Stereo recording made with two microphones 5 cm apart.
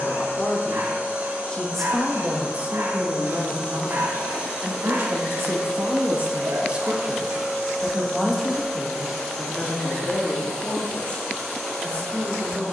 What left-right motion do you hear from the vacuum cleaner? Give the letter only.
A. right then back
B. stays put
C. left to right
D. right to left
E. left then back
D.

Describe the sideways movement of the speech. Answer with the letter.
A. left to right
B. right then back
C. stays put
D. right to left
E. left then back
B.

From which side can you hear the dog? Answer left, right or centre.
right.